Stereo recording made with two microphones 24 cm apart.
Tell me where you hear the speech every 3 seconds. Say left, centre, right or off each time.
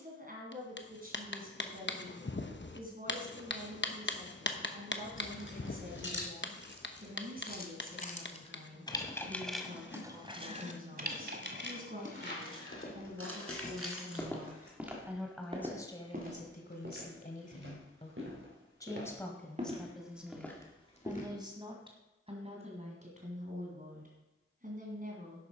right, right, right, right, right, left, centre, right, right.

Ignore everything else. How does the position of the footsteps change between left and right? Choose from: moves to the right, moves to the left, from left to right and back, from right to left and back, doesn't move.
from left to right and back.